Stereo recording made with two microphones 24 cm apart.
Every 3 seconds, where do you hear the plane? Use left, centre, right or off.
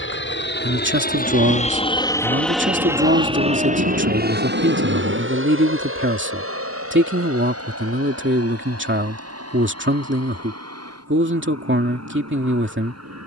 left, right, right, right, right.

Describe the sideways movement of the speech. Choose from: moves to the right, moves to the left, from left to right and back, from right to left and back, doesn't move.
doesn't move.